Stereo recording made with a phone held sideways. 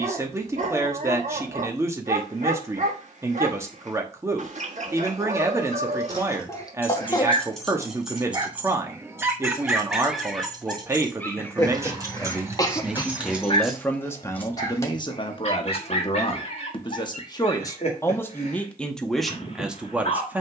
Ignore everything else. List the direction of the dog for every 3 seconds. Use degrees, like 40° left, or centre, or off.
50° right, 50° right, 30° right, centre, 30° left, 50° left, 50° left.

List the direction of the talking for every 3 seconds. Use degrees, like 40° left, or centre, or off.
20° right, 20° right, 20° right, 20° right, 10° left, 30° left, centre.